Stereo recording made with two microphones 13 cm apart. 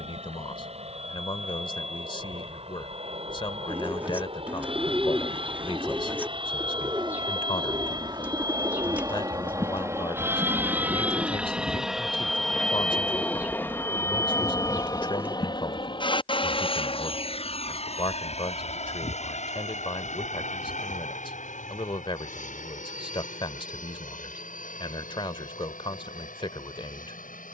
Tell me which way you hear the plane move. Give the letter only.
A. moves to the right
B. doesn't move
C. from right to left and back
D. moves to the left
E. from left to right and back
D.